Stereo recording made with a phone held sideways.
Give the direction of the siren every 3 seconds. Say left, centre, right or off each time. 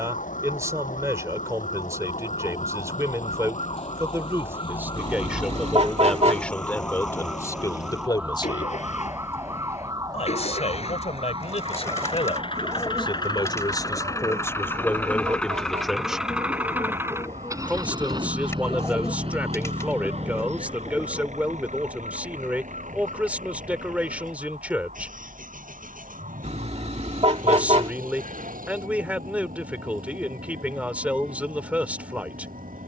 left, left, centre, right, right, right, right, right, right, right, right.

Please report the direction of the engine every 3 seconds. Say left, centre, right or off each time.
left, left, left, left, left, centre, right, right, right, right, right.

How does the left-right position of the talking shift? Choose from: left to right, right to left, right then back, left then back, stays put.
left then back.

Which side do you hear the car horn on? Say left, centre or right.
right.